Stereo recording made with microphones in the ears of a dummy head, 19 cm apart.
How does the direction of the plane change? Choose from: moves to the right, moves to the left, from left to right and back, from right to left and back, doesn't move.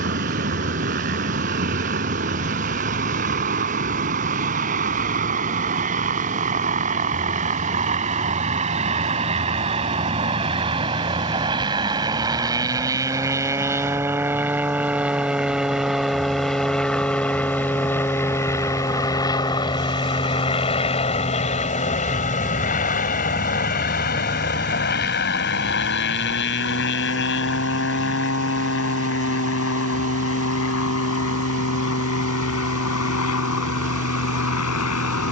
moves to the left.